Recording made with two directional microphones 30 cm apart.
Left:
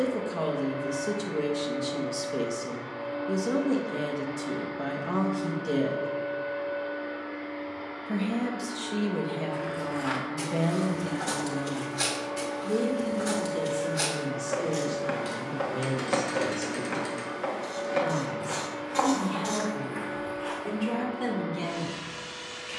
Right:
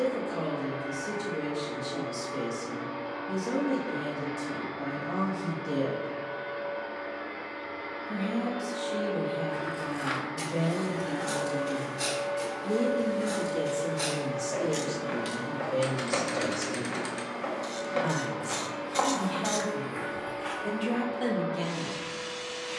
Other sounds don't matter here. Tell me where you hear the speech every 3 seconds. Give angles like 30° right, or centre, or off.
40° left, 40° left, 40° left, 30° left, 20° right, 40° right, 40° right, centre.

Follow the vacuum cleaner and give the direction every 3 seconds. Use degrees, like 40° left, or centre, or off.
40° right, 40° right, 40° right, 30° right, 10° right, centre, 20° right, 30° right.